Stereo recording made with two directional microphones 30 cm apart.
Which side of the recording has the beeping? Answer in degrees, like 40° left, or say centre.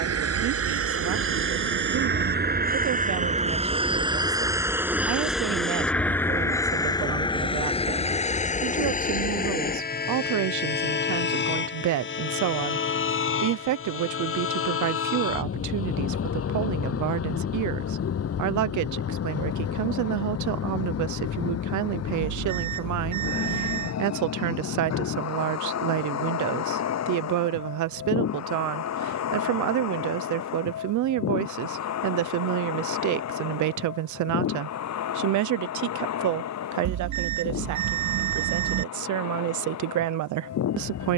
70° right.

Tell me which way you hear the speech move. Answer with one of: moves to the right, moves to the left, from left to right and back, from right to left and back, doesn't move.
doesn't move.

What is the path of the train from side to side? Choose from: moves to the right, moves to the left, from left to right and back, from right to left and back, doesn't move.
moves to the left.